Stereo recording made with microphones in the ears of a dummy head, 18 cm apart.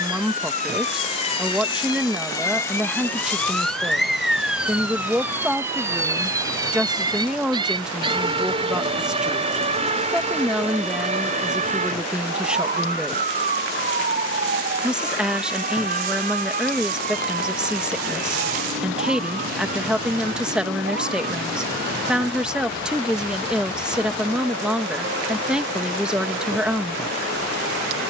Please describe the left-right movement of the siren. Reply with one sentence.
In this clip you hear the siren travel towards the right.